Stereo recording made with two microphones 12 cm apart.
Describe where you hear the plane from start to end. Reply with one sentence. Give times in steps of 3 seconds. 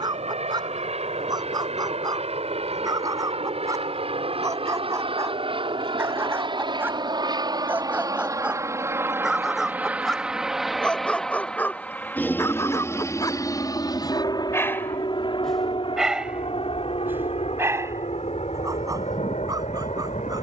In this clip you hear the plane on the right from 0 s, in the centre from 9 s and on the left from 12 s.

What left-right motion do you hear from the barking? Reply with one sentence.
You can hear the barking move from right to left and back again.